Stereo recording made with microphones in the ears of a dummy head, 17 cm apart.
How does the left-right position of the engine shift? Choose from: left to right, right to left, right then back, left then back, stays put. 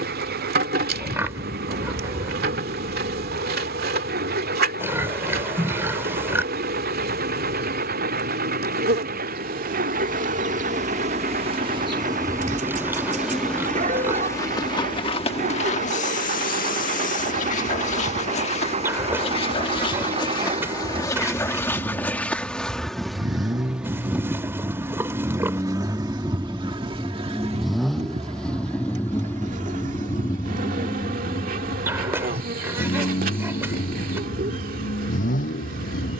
right to left.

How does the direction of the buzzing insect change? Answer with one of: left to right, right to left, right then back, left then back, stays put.
left then back.